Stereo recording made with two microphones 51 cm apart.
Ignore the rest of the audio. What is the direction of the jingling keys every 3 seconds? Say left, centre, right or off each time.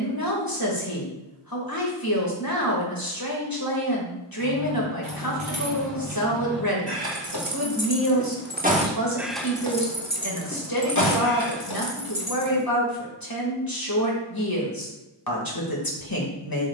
off, right, right, left, left, off.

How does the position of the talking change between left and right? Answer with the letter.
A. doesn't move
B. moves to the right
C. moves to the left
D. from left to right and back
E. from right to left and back
A.